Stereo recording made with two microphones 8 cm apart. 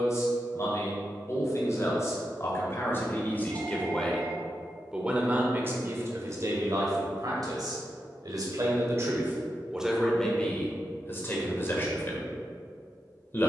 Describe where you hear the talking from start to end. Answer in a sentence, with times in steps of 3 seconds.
In this clip you hear the talking on the left from 0 s, in the centre from 3 s, on the right from 6 s, in the centre from 9 s and on the left from 12 s.